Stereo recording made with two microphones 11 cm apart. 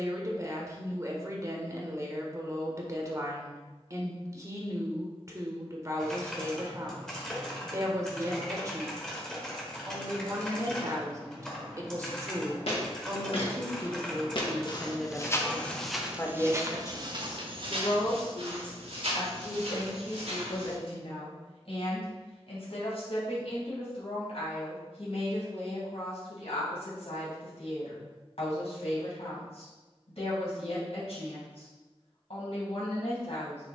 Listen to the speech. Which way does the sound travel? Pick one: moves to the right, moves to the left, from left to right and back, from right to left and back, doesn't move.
moves to the left.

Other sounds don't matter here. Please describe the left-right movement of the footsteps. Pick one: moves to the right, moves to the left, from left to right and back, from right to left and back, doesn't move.
moves to the right.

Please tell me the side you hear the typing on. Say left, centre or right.
centre.